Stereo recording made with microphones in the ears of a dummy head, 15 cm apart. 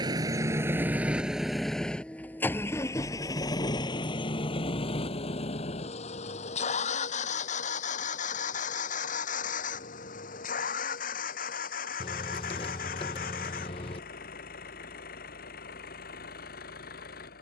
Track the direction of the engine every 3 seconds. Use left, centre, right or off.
centre, left, left, left, left, left.